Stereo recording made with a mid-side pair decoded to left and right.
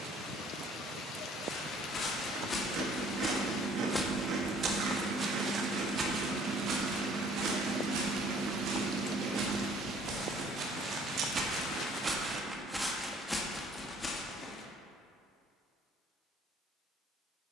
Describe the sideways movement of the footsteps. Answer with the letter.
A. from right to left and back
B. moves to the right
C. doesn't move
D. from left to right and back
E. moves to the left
D.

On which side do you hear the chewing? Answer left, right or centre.
right.